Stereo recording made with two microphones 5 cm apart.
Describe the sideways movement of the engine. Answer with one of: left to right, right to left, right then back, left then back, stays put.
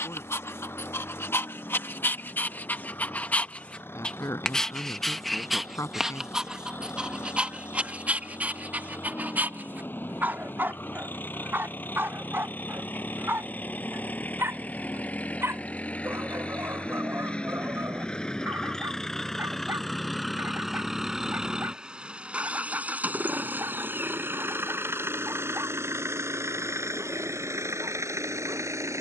left to right.